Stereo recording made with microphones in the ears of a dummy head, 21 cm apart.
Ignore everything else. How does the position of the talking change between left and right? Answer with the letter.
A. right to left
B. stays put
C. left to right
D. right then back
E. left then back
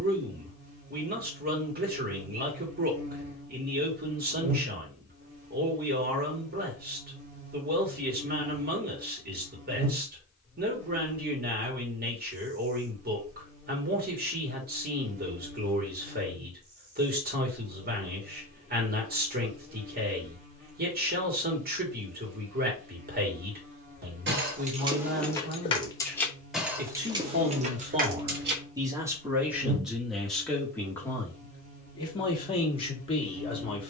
A.